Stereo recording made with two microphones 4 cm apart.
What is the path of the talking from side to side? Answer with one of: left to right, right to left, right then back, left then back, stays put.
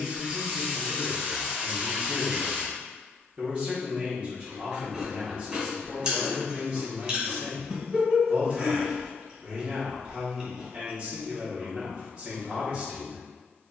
stays put.